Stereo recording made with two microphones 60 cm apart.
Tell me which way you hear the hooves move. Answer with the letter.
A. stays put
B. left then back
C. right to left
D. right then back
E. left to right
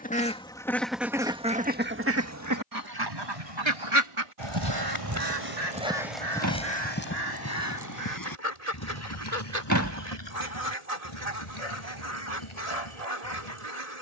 C.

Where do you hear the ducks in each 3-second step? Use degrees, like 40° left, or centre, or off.
10° right, 60° right, 80° right, 80° right, 80° right.